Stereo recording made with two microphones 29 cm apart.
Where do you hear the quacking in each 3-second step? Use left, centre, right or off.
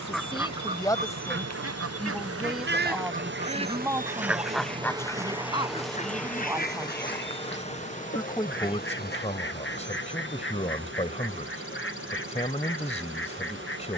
right, centre, left, left, left.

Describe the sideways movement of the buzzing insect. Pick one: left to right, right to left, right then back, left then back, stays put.
right to left.